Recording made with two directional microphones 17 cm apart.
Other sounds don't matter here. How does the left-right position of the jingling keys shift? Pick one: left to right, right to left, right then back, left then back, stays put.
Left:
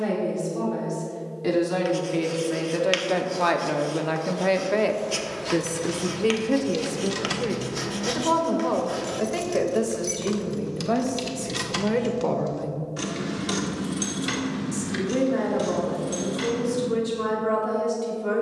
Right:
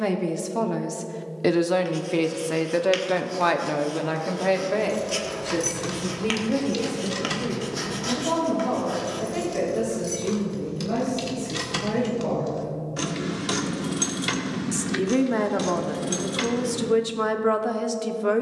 left then back.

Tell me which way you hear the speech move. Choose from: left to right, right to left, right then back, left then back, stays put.
left then back.